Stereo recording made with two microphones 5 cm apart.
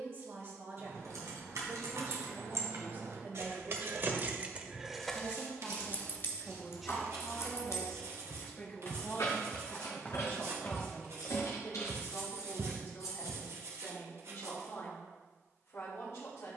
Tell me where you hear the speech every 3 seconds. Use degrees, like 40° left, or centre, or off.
50° right, 30° right, 10° left, 40° left, 50° left, 60° left.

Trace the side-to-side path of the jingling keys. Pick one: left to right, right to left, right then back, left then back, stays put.
right to left.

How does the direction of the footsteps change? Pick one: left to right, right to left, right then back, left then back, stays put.
left to right.